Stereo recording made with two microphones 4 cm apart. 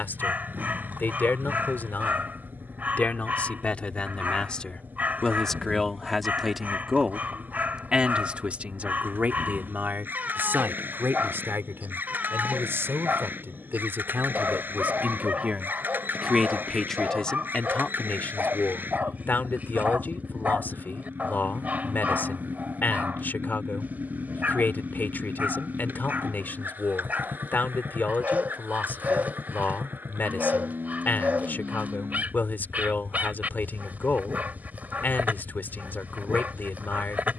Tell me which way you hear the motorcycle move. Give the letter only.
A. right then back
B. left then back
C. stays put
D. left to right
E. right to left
C.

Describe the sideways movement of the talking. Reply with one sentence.
You can hear the talking go right and come back.